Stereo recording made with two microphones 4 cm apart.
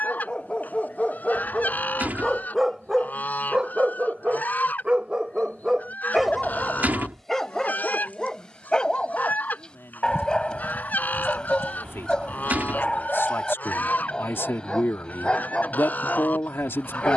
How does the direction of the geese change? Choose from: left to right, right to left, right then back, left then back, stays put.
stays put.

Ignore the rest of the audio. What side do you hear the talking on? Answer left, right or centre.
left.